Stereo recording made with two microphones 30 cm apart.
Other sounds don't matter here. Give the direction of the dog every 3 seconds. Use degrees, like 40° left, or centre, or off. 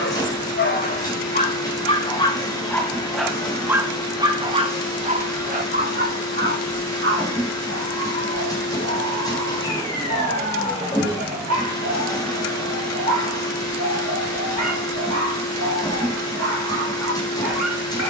20° left, 20° right, 40° right, 60° right, 60° right, 60° right.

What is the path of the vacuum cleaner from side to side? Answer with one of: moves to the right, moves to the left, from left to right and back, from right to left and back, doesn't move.
doesn't move.